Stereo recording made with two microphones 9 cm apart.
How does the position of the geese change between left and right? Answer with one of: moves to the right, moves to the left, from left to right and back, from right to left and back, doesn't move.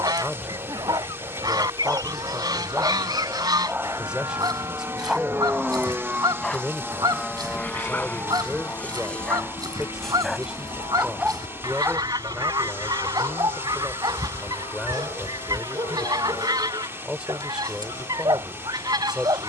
doesn't move.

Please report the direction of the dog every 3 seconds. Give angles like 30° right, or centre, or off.
50° right, 10° right, 20° left, centre, 50° right, 50° right, 50° right.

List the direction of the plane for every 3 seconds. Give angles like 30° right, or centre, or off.
60° right, 40° right, 10° left, 40° left, 60° left, 70° left, 70° left.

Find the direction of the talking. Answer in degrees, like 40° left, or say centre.
10° right.